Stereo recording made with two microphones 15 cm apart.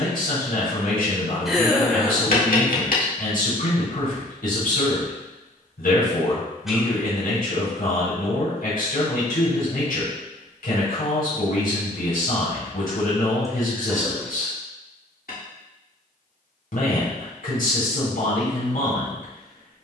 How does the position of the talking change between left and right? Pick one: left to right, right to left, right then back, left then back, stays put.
stays put.